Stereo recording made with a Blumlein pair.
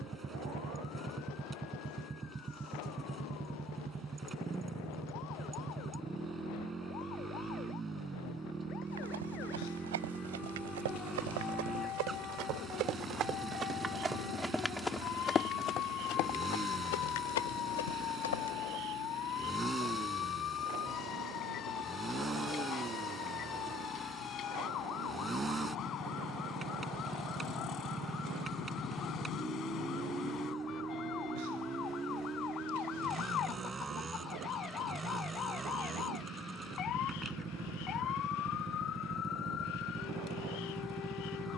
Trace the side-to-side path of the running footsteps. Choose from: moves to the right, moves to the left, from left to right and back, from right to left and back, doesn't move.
moves to the left.